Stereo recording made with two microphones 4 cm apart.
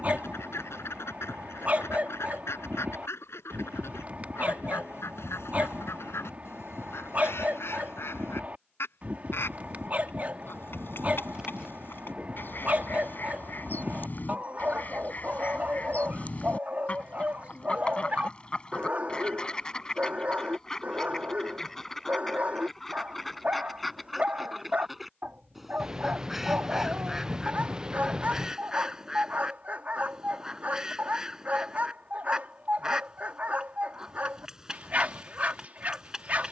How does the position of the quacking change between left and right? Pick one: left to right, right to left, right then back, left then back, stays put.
left to right.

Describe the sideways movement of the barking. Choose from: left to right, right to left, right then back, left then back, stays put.
stays put.